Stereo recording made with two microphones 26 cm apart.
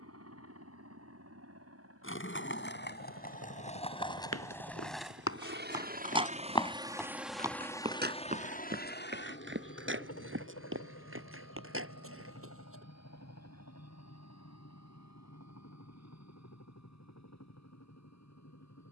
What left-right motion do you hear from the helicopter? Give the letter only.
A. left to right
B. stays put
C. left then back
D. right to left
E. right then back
D.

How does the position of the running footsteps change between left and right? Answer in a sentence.
In this clip you hear the running footsteps move from left to right.